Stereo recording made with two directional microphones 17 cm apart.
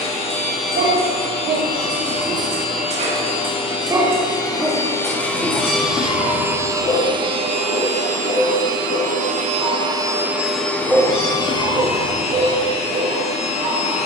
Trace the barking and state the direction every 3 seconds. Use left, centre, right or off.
right, centre, left, centre, right.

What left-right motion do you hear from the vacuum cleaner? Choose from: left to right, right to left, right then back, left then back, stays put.
right then back.